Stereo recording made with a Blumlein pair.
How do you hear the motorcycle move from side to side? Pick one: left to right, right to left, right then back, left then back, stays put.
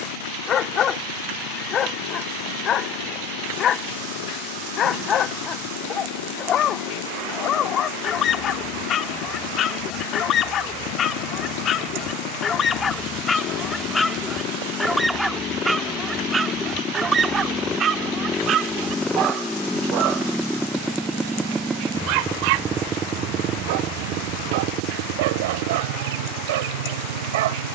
left to right.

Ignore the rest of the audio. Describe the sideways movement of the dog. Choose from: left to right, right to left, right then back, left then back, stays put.
left to right.